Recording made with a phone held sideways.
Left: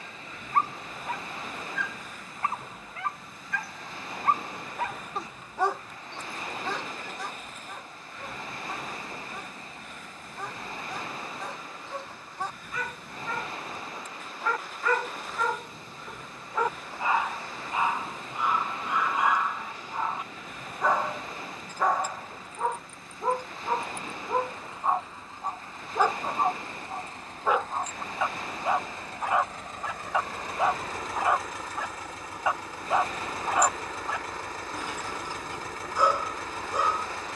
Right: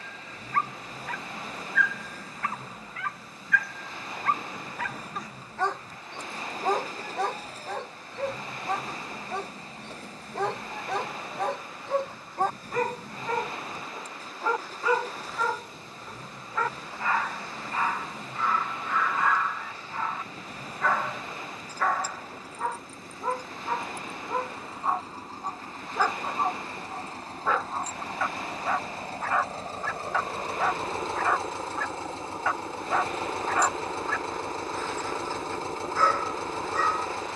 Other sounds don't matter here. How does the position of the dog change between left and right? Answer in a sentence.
You can hear the dog go right and come back.